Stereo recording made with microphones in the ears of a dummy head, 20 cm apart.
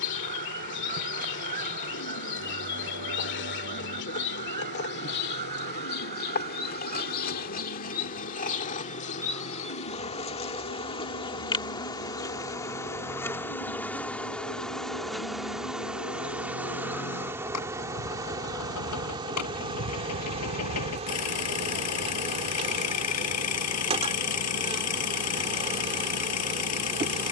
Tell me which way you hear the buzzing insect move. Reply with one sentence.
You can hear the buzzing insect move from left to right.